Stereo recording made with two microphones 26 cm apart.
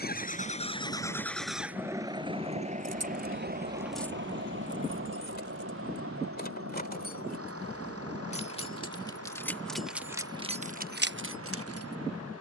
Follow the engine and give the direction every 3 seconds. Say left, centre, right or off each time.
centre, right, right, right.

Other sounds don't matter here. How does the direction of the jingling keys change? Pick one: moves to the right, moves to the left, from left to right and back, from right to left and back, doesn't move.
from right to left and back.